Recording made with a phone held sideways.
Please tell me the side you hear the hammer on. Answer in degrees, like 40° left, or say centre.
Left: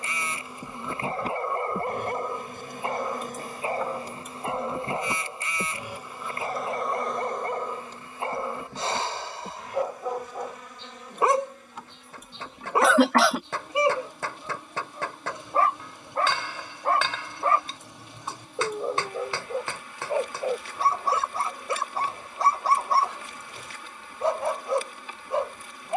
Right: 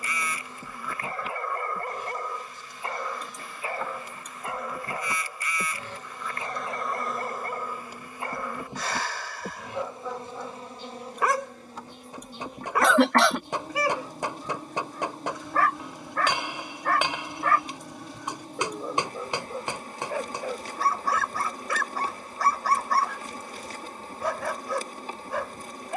20° right.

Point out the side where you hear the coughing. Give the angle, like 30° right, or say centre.
centre.